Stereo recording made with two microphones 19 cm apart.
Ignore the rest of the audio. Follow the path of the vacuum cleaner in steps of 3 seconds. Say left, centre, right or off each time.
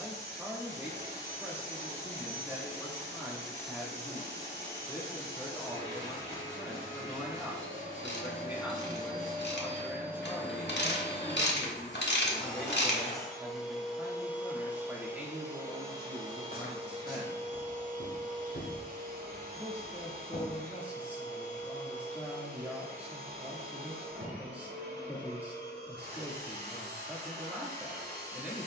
right, right, right, centre, centre, right, right, right, right, right.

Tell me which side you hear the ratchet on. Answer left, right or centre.
left.